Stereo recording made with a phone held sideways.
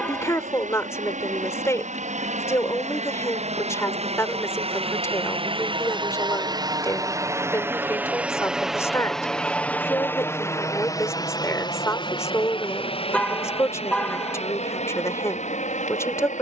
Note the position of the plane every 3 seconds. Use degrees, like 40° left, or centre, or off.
60° right, 50° right, 20° right, 20° left, 40° left, 50° left.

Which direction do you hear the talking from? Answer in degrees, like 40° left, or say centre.
20° left.